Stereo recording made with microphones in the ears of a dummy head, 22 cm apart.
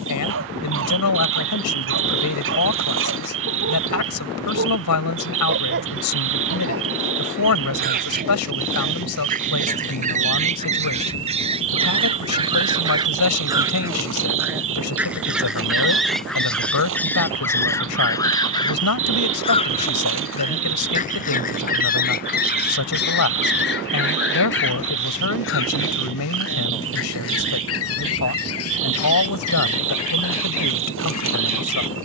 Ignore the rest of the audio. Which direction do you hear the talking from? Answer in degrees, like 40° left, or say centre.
80° left.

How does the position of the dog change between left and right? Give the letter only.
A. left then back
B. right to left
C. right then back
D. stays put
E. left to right
B.